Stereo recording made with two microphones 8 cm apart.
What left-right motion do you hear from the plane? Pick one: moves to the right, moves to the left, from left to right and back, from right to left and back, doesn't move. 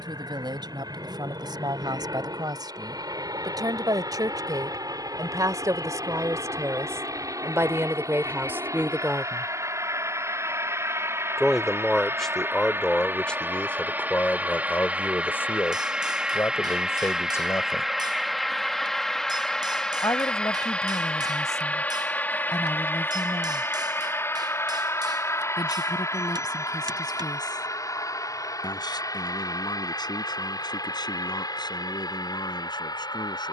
moves to the left.